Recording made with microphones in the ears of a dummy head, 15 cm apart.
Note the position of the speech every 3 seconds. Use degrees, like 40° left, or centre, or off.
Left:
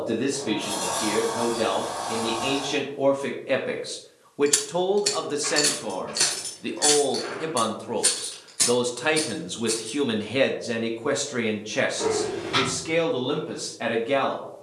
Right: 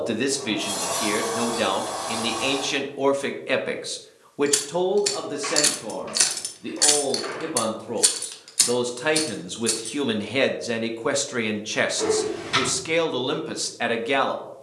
50° right, centre, 20° left, 10° right, 40° right.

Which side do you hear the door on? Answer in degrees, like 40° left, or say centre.
40° right.